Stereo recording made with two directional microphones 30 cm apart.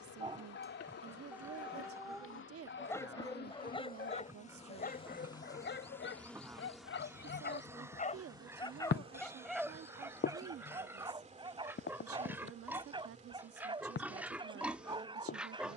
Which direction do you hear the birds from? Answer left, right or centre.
left.